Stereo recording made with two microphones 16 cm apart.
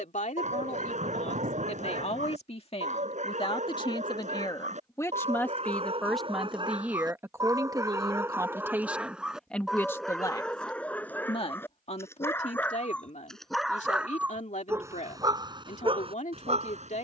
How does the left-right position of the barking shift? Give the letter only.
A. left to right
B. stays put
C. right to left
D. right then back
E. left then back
E.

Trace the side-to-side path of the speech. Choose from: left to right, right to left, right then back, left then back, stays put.
right then back.